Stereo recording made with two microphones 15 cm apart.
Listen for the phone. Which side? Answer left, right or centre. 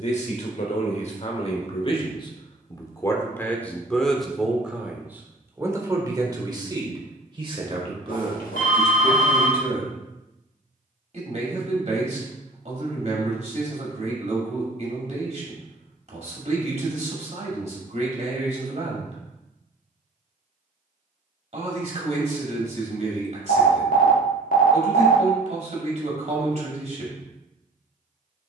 left.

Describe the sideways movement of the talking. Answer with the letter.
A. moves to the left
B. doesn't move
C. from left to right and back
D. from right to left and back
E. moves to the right
E.